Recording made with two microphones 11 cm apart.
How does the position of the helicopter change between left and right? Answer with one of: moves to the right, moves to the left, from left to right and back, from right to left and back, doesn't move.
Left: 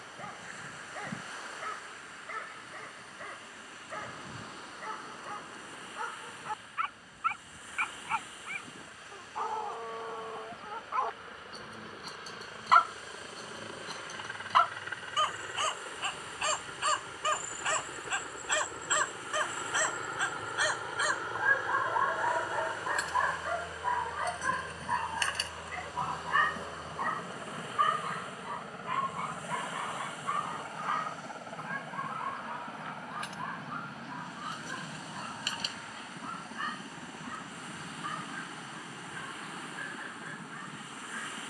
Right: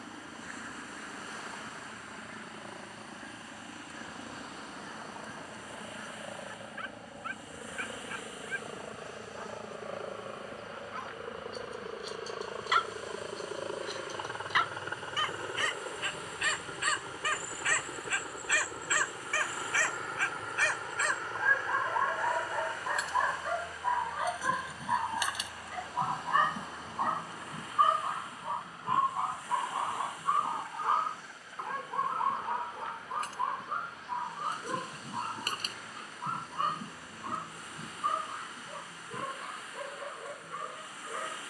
moves to the left.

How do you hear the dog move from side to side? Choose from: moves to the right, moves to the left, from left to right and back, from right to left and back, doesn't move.
moves to the right.